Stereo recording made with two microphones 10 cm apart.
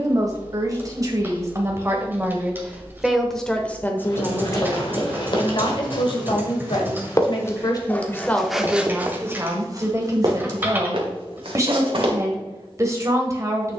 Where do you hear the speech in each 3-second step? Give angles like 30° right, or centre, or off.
30° right, 30° left, 40° left, 30° right, 30° right.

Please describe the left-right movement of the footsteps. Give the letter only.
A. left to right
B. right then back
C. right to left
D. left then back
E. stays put
A.